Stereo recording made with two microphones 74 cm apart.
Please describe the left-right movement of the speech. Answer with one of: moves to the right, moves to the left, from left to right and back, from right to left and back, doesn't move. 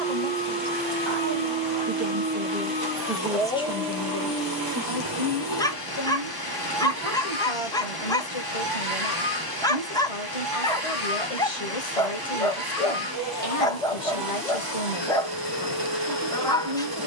moves to the left.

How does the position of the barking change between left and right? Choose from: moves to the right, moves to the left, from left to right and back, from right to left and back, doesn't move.
doesn't move.